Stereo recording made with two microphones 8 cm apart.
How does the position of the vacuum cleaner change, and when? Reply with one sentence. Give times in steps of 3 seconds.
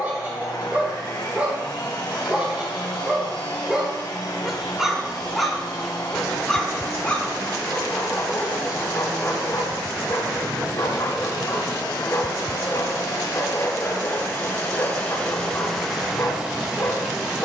In this clip you hear the vacuum cleaner on the left from 0 s and in the centre from 15 s.